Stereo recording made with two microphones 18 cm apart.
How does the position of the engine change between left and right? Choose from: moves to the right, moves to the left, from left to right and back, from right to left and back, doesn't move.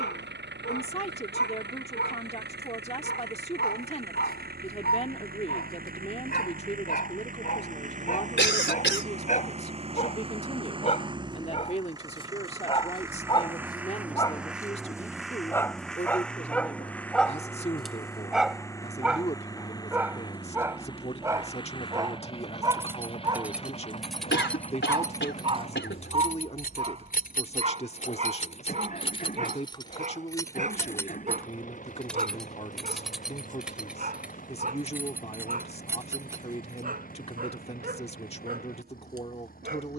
moves to the left.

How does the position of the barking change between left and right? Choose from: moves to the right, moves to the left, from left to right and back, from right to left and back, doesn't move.
moves to the right.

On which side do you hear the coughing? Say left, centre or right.
left.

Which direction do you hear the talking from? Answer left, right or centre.
left.